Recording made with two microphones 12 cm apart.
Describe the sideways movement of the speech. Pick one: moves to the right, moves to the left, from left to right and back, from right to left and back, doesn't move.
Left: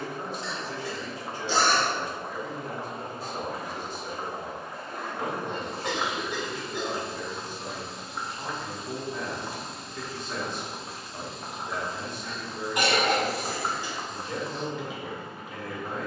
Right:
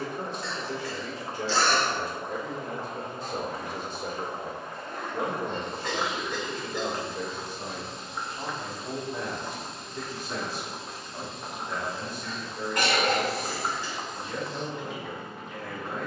moves to the left.